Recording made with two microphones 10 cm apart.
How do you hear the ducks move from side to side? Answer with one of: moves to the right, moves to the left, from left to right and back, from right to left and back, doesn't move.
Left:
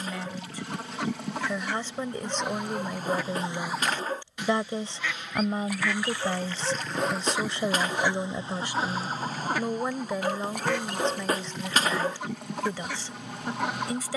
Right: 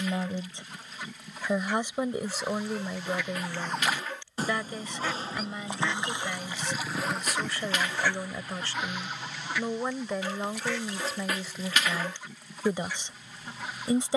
from left to right and back.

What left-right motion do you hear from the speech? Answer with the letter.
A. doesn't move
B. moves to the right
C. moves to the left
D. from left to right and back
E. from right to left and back
E.